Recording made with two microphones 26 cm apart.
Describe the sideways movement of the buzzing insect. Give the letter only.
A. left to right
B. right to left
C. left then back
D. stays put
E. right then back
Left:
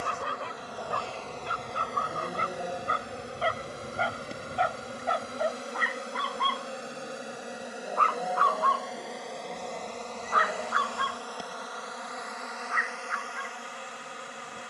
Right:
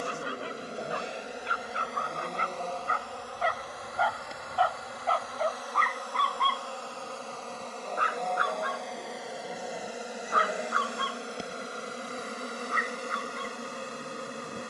C.